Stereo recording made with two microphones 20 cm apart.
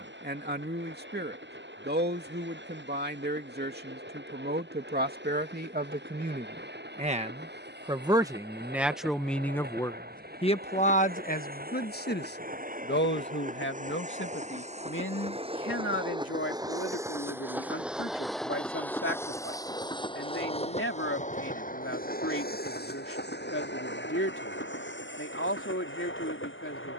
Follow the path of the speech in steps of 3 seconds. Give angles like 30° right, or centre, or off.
50° right, 50° right, 20° right, 30° left, 70° left, 80° left, 80° left, 80° left, 80° left.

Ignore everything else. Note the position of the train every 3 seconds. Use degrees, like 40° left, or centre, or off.
60° right, 60° right, 60° right, 50° right, 40° right, 20° right, 20° left, 50° left, 70° left.